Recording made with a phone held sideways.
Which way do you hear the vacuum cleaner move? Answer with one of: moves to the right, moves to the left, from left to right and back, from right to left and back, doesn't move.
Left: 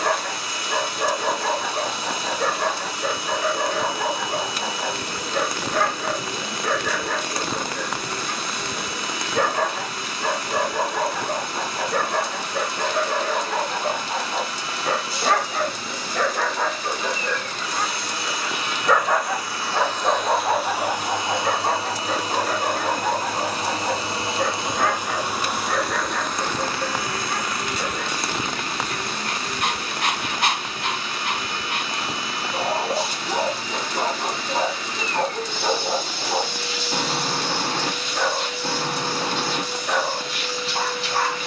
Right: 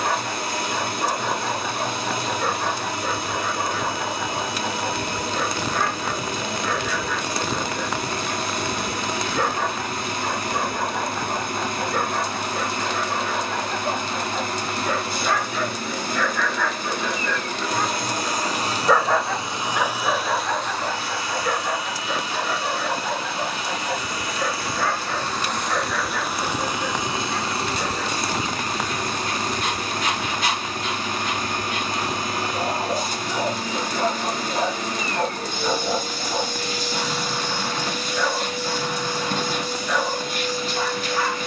from right to left and back.